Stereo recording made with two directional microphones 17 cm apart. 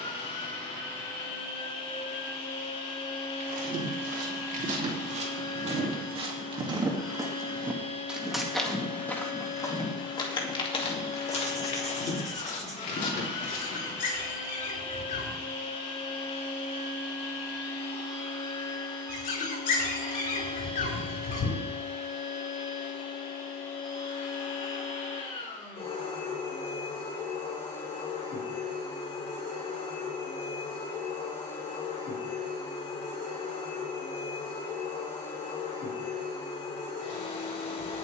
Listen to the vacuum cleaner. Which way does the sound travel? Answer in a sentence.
In this clip you hear the vacuum cleaner stay in one place.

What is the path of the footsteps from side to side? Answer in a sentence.
You can hear the footsteps travel towards the left.